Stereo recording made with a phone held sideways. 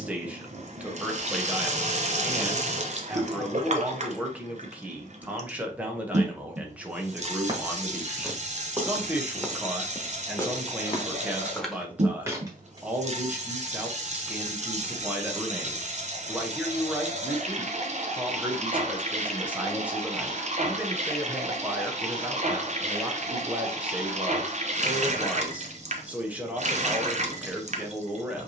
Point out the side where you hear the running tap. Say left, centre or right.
right.